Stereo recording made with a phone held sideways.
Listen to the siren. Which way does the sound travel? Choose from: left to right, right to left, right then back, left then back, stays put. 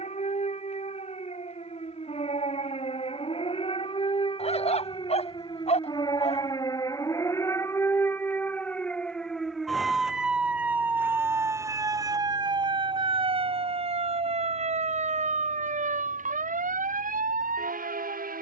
left to right.